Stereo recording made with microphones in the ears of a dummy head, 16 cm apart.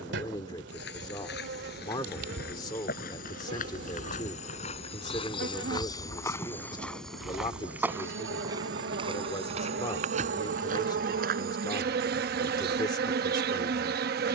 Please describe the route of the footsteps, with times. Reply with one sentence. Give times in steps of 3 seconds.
In this clip you hear the footsteps on the left from 0 s, in the centre from 6 s and on the right from 9 s.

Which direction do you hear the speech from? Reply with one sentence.
In this clip you hear the speech on the left.